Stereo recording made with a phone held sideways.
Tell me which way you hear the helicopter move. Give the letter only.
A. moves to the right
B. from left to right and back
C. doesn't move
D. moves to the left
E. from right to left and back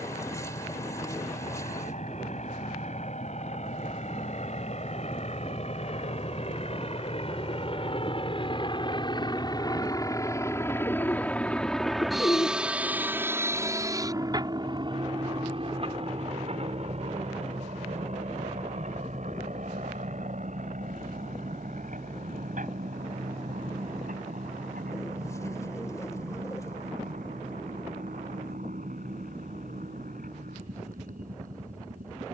A.